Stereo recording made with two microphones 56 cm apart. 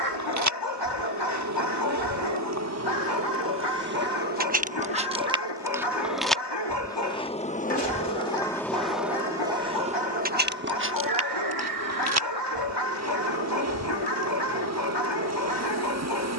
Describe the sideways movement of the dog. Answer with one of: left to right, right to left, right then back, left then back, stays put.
stays put.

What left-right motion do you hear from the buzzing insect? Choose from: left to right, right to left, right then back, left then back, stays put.
left then back.